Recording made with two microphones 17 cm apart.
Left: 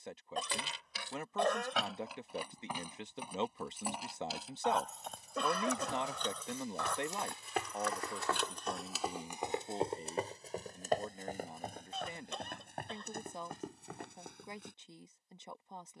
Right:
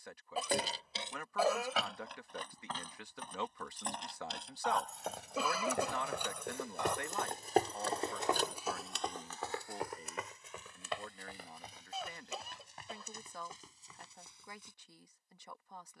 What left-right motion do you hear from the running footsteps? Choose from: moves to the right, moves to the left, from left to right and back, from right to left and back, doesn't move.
moves to the left.